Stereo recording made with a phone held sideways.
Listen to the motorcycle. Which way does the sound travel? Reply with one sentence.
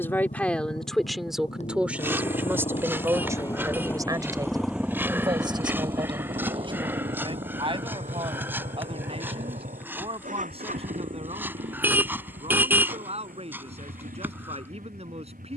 In this clip you hear the motorcycle go from the left side to the right.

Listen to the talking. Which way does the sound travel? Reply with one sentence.
You can hear the talking move to the right.